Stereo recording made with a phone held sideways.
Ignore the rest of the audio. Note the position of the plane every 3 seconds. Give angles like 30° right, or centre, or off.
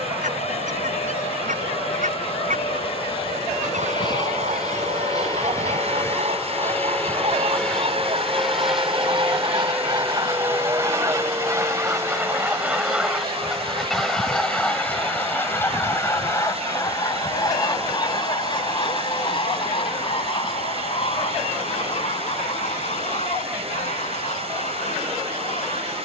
50° left, 30° left, 10° left, 10° right, 30° right, 40° right, 50° right, 50° right, 50° right.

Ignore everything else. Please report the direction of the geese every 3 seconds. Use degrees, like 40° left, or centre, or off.
70° right, 60° right, 50° right, 30° right, centre, 20° left, 40° left, 50° left, 60° left.